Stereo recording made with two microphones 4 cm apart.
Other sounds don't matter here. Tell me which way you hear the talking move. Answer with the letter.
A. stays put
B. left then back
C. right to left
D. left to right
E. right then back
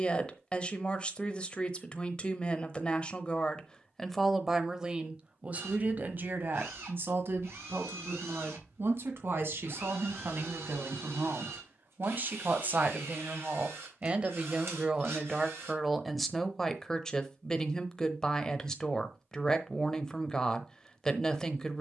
E.